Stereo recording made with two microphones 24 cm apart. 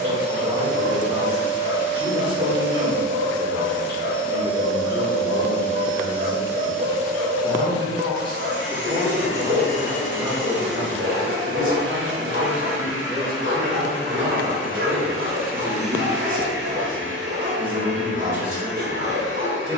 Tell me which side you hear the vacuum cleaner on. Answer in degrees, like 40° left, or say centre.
50° left.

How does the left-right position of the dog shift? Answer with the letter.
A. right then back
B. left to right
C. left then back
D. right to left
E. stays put
E.